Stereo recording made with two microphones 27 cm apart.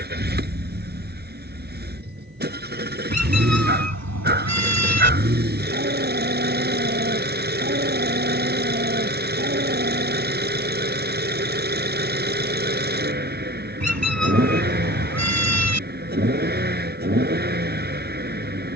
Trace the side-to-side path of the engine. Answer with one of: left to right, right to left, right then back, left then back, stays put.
stays put.